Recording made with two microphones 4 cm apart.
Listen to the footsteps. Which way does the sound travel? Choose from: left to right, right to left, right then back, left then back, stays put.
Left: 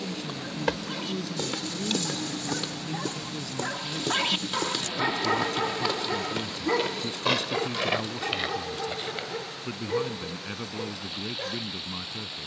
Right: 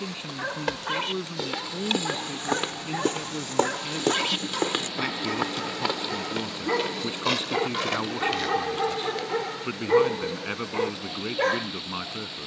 right then back.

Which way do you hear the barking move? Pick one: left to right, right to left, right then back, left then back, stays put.
left then back.